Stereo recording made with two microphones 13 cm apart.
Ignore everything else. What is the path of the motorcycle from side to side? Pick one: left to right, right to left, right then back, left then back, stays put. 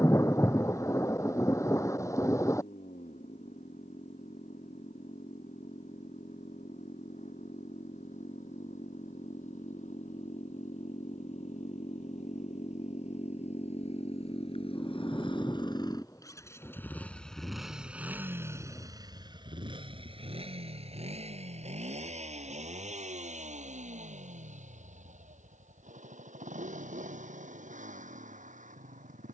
left to right.